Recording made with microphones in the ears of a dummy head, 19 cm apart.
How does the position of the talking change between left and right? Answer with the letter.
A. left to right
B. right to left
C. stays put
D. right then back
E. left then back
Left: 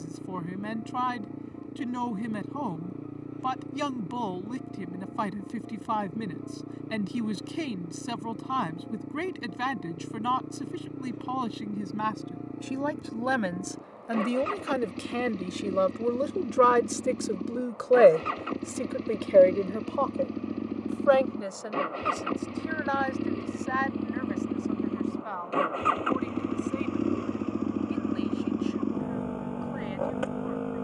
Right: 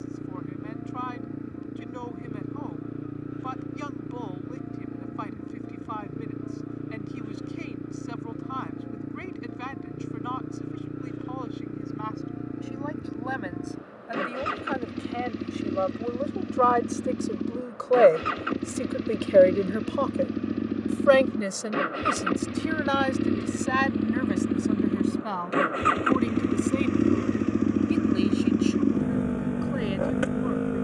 A.